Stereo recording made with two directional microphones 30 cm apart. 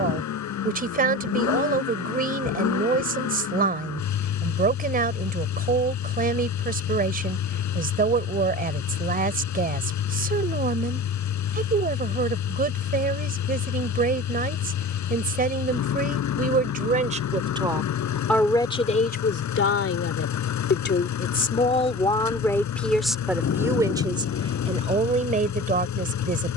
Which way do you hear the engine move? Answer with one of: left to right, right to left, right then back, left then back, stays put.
stays put.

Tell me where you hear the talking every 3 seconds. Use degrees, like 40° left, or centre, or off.
30° right, 30° right, 30° right, 30° right, 30° right, 30° right, 30° left, 10° left, 20° right.